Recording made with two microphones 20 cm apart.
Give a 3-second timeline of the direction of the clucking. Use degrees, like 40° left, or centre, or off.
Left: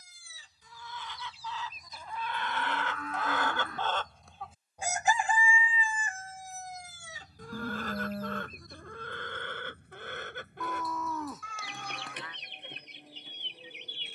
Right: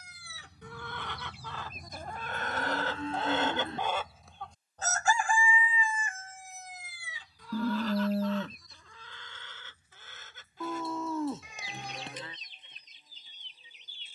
60° right, centre, 50° left, 60° left, 70° left.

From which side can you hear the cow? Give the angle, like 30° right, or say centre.
30° right.